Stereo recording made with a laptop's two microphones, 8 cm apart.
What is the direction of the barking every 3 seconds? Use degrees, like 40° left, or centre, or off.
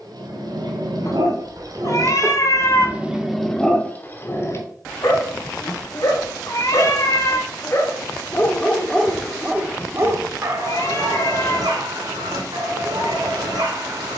50° right, 20° left, 30° left, 40° right, 60° right.